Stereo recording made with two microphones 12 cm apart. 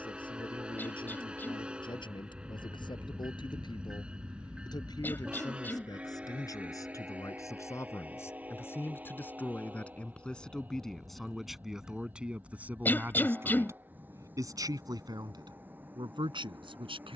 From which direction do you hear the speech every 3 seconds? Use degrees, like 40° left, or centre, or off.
50° left, 40° left, 30° left, 10° left, 20° right, 50° right.